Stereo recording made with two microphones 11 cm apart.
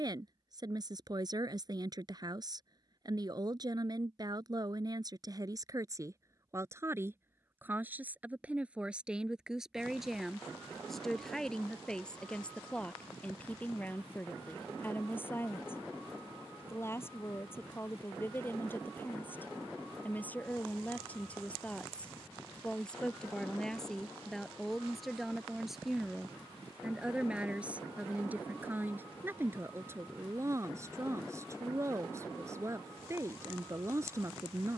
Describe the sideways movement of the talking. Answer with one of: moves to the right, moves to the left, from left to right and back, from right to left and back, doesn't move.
from right to left and back.